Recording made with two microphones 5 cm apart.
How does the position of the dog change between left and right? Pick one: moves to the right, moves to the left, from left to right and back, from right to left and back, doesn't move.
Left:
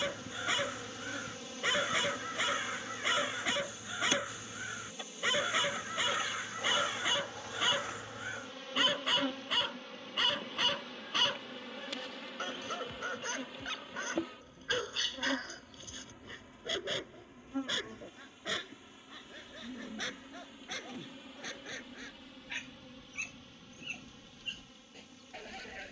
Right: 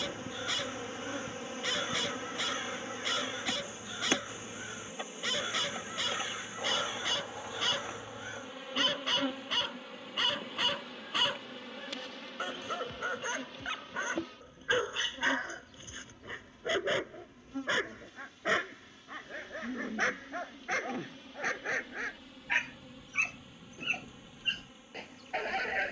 moves to the right.